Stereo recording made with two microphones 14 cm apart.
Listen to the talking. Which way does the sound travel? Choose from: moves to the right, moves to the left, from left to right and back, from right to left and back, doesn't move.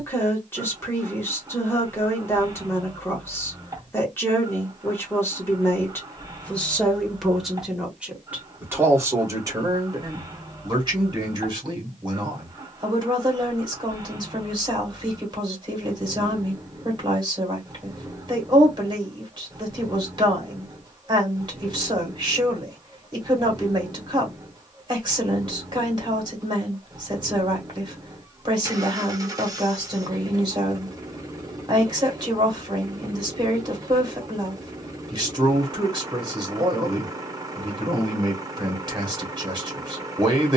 moves to the right.